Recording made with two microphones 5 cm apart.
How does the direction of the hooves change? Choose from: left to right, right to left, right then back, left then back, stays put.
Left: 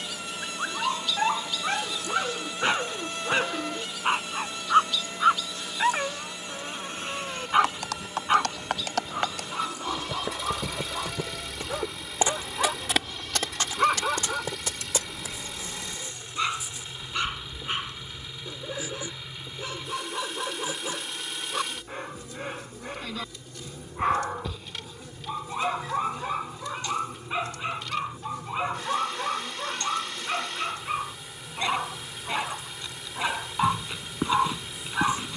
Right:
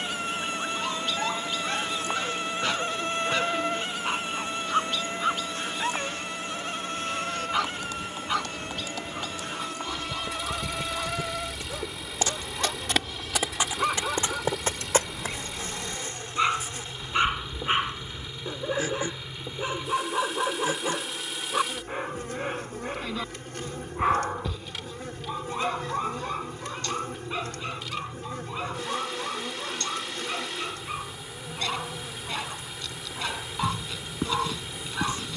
left to right.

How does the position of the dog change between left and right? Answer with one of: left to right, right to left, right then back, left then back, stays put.
right then back.